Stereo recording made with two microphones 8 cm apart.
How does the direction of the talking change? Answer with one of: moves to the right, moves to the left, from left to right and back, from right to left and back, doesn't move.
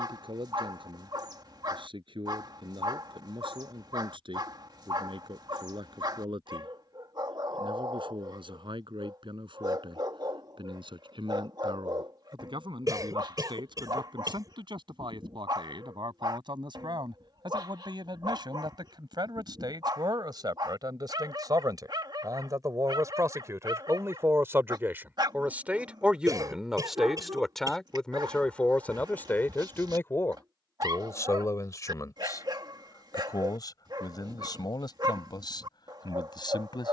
moves to the left.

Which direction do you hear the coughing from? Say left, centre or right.
right.